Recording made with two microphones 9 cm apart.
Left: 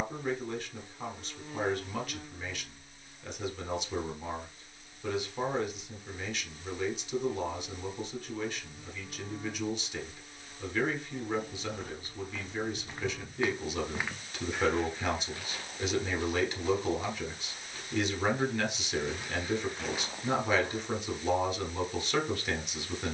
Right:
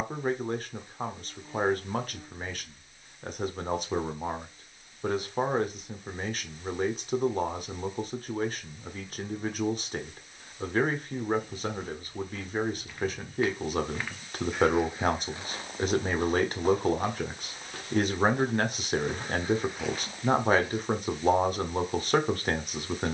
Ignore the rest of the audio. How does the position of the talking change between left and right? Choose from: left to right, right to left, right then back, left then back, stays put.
stays put.